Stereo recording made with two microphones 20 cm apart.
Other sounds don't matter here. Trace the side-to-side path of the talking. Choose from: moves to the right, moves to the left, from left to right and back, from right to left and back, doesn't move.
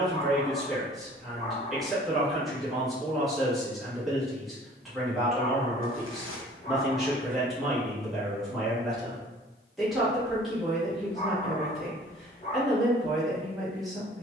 doesn't move.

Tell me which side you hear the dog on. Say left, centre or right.
left.